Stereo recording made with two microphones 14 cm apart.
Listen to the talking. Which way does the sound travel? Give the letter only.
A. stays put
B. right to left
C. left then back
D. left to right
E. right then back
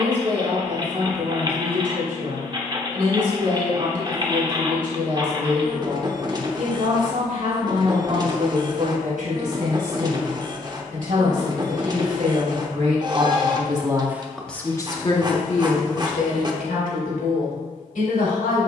B.